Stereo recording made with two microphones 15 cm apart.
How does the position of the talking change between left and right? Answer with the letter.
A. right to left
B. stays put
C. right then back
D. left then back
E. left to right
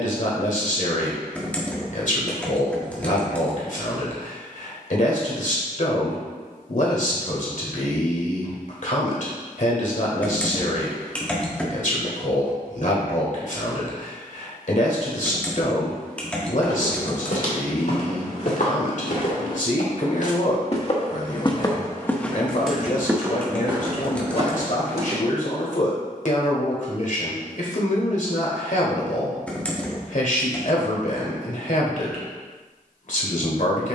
B.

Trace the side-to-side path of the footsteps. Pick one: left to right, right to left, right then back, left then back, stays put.
left to right.